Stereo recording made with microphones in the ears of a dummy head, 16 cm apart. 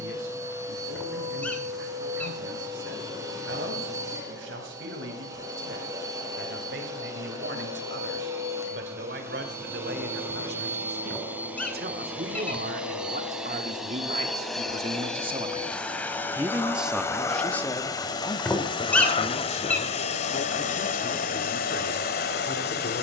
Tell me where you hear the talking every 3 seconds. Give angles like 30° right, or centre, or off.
80° right, 70° right, 70° right, 60° right, 50° right, 10° right, 40° left, 60° left.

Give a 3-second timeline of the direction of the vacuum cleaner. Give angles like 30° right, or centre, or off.
20° right, 20° right, 20° right, 10° right, centre, 10° left, 40° left, 60° left.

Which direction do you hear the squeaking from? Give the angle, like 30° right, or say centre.
10° left.